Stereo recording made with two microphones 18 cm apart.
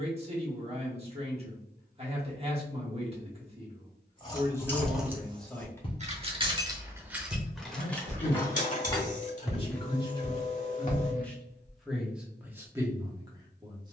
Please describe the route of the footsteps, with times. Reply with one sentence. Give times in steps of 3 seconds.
In this clip you hear the footsteps not at all from 0 s, on the left from 3 s, on the right from 6 s, on the left from 9 s and not at all from 12 s.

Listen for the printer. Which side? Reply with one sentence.
You can hear the printer on the left.